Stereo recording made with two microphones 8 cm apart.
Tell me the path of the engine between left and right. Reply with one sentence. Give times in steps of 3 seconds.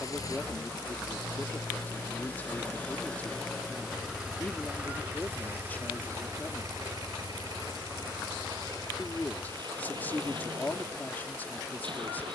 In this clip you hear the engine on the left from 0 s, in the centre from 3 s and on the right from 6 s.